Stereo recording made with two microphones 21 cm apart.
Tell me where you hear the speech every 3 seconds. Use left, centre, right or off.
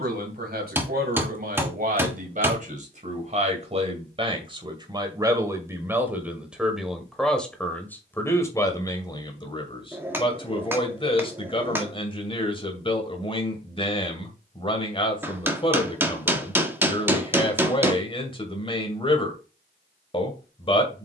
right, right, centre, left, left, left, left.